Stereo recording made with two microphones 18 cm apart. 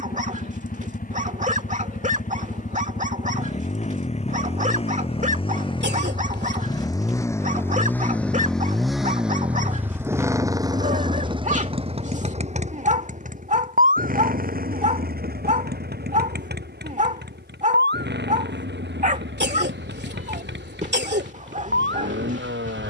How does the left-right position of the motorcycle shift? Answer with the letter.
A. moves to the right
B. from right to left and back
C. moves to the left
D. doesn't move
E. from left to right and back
A.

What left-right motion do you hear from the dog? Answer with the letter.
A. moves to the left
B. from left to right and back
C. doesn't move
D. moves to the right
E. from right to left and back
C.